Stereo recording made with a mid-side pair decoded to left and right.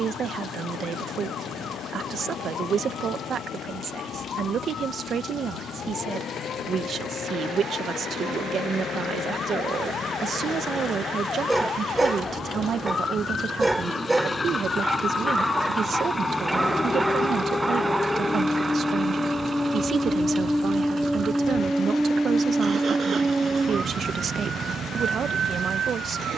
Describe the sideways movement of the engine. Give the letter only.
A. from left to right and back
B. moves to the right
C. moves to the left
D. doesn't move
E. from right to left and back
B.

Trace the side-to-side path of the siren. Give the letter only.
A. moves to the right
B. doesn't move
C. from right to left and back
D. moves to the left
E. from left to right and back
A.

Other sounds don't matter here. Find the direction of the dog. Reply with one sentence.
In this clip you hear the dog in the centre.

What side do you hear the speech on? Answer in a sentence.
In this clip you hear the speech on the right.